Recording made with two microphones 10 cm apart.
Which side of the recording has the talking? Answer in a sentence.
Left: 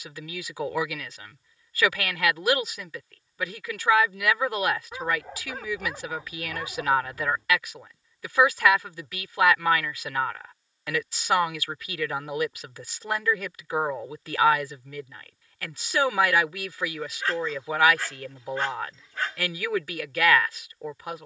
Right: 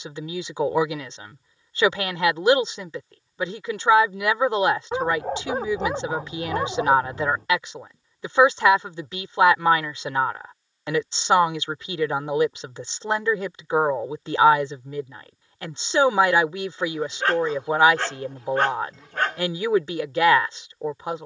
In this clip you hear the talking on the right.